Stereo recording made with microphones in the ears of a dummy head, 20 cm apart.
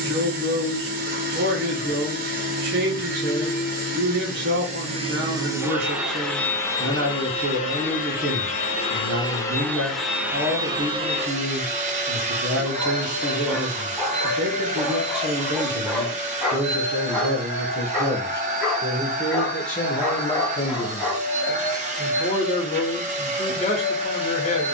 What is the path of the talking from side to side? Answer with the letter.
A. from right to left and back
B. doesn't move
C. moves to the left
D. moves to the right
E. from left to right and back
C.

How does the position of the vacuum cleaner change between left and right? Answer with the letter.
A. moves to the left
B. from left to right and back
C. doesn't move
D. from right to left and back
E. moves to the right
D.